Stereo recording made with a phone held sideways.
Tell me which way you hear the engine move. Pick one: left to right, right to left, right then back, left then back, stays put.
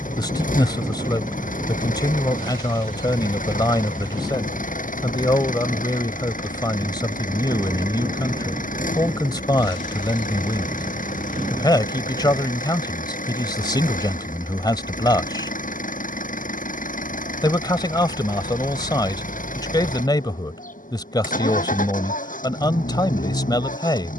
stays put.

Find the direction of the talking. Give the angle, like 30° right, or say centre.
30° left.